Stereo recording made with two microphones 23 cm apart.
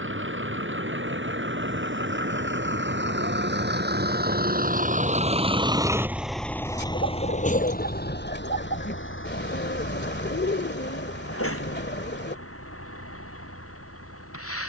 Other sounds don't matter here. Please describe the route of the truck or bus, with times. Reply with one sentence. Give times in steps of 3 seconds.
You can hear the truck or bus on the right from 0 s and on the left from 6 s.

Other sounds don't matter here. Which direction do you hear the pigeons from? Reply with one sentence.
You can hear the pigeons on the left.